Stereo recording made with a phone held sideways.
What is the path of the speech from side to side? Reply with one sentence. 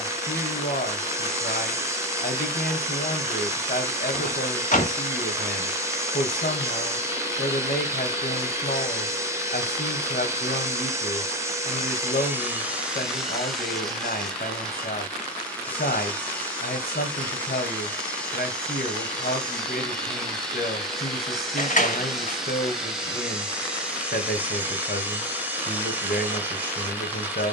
You can hear the speech stay in one place.